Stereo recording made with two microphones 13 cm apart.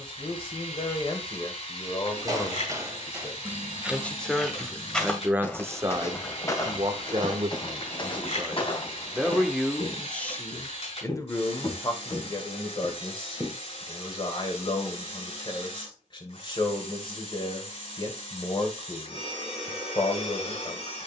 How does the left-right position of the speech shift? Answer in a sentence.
In this clip you hear the speech go right and come back.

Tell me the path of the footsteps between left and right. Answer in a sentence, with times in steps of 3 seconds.
You can hear the footsteps on the right from 0 s, in the centre from 3 s, on the left from 6 s, in the centre from 12 s and not at all from 15 s.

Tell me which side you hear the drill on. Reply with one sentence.
In this clip you hear the drill on the left.